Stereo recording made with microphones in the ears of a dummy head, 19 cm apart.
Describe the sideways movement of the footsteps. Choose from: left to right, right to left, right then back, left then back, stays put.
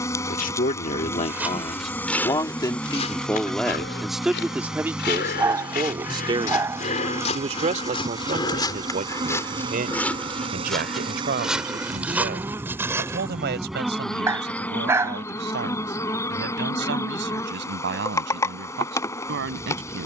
left then back.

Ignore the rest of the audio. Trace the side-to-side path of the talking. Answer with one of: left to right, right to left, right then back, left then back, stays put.
left to right.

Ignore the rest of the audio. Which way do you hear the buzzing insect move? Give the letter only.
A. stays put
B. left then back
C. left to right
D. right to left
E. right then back
E.